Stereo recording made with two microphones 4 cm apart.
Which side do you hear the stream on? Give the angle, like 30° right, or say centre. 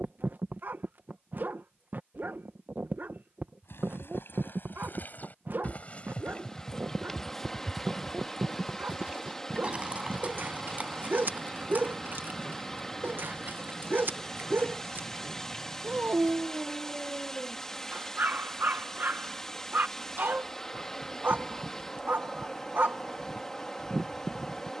10° left.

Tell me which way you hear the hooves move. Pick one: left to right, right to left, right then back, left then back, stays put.
left to right.